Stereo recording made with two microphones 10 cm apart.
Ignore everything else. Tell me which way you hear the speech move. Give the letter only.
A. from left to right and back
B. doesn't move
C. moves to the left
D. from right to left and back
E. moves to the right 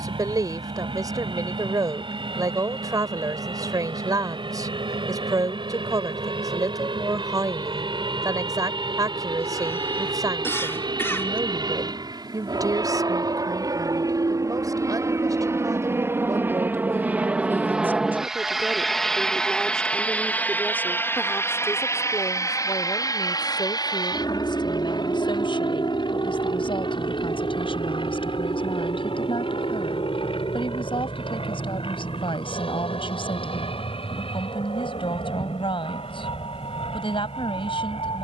C.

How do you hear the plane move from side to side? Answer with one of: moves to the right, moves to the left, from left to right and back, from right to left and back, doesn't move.
moves to the left.